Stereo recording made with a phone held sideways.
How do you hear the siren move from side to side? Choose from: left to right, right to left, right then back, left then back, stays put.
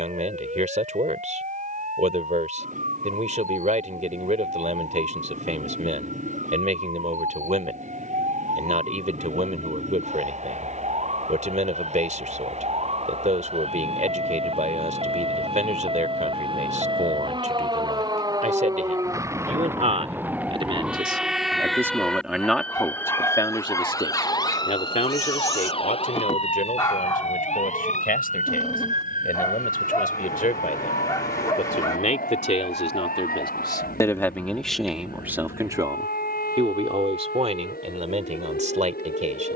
right to left.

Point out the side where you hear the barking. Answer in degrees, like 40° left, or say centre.
20° left.